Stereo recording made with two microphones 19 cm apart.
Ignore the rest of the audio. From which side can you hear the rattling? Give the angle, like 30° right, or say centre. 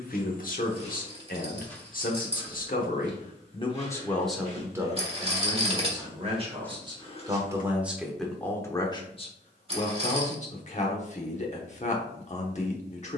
30° right.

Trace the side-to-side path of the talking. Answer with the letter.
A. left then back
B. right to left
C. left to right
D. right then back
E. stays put
D.